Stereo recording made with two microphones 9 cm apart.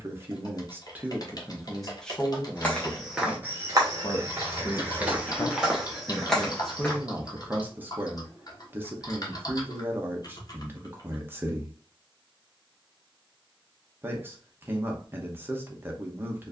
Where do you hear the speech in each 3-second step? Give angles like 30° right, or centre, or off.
centre, 30° left, 10° right, 20° right, 20° right, 20° right.